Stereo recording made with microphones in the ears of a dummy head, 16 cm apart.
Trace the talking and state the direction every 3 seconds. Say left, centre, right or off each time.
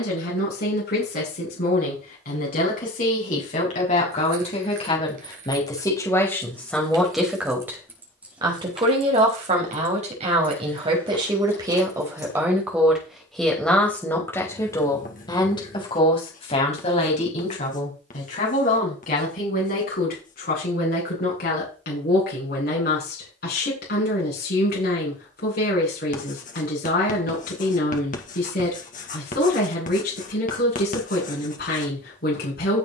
left, left, centre, right, centre, left, left, left, left, left, left.